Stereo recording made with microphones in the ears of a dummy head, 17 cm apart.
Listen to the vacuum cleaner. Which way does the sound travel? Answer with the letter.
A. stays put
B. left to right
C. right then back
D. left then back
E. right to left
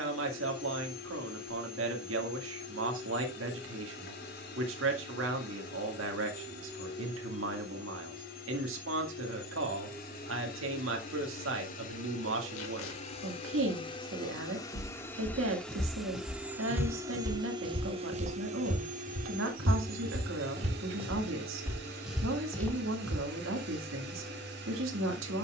B.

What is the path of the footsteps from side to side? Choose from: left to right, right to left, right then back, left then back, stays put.
right then back.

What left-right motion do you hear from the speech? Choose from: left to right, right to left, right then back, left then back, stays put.
stays put.